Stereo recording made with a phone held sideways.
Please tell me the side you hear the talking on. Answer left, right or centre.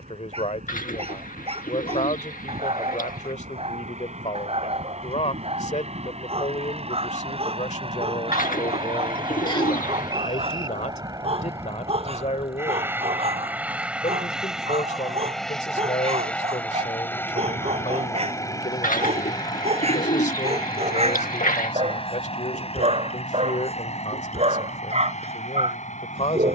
left.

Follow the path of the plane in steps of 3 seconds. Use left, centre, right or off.
right, right, right, right, centre, centre, left, left, left.